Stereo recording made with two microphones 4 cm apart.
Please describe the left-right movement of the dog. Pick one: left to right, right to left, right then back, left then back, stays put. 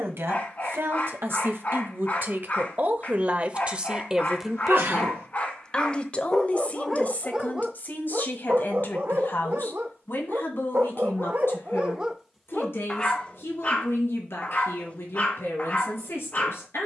right then back.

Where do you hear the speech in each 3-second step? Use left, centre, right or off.
right, centre, left, left, left, left.